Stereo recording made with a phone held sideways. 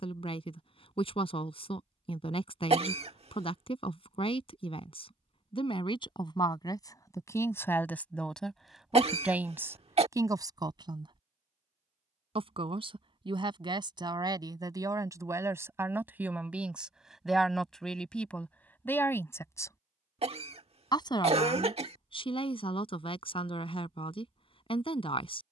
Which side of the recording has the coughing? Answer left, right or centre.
right.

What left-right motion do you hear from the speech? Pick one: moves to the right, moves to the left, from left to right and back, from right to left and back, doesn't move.
from left to right and back.